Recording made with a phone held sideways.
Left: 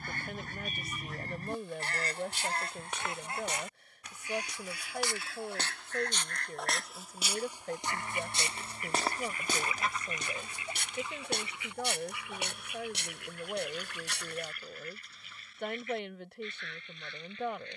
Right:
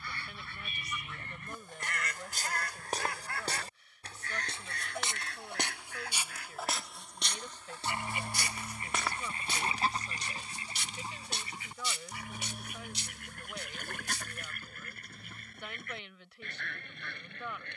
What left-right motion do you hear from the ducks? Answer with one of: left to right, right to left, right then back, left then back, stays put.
left to right.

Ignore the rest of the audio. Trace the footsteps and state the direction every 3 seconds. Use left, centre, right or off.
right, right, centre, left, left, off.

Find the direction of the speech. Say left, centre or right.
left.